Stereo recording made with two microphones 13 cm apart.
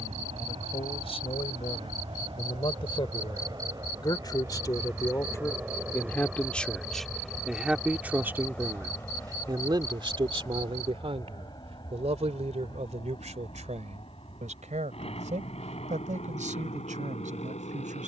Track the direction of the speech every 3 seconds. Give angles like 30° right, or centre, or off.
50° left, 30° left, 10° right, 40° right, 60° right, 80° right.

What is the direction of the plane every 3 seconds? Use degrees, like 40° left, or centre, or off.
50° right, 20° right, centre, 30° left, 40° left, 50° left.